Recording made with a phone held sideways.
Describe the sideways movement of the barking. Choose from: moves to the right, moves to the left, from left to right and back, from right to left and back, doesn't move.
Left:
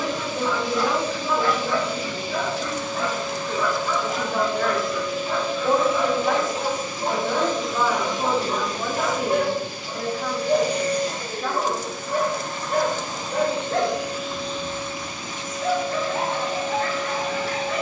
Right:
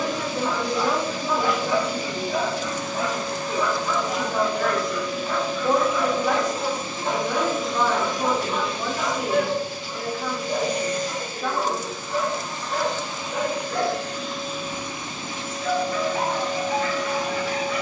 moves to the left.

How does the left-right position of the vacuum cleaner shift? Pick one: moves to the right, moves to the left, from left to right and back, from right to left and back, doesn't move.
from right to left and back.